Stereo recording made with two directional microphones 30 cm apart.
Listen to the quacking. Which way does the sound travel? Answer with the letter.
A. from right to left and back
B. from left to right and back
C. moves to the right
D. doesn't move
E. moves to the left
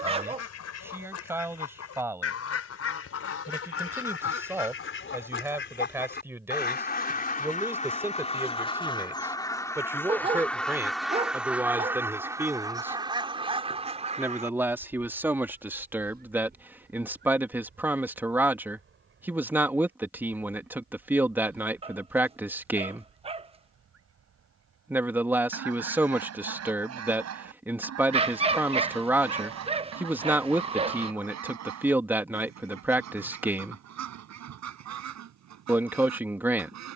C.